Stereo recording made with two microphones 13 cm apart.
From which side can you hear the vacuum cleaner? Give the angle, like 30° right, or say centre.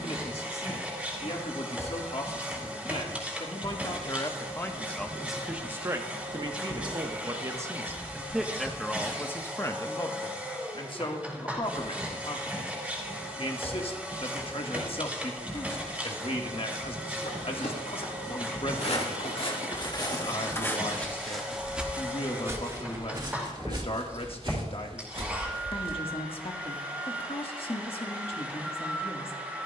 10° right.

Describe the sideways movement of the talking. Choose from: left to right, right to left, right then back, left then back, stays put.
right then back.